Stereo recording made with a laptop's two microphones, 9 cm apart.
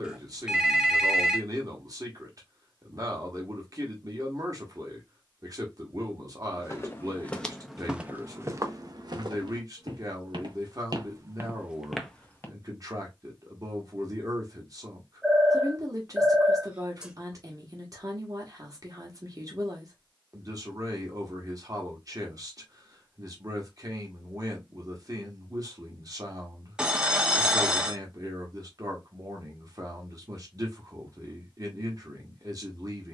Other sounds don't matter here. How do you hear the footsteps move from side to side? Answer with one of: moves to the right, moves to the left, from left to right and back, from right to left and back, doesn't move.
from left to right and back.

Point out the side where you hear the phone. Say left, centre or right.
centre.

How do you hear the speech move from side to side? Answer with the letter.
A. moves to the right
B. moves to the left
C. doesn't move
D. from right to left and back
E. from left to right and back
C.